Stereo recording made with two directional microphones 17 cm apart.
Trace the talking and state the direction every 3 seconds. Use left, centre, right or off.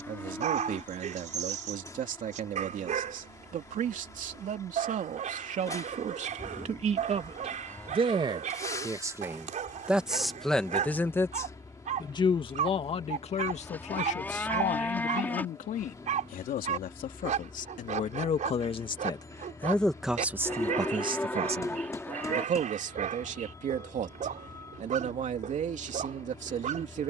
right, right, right, centre, left, left, centre, right, right.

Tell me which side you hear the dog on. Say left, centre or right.
right.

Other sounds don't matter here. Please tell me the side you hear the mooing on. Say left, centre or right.
centre.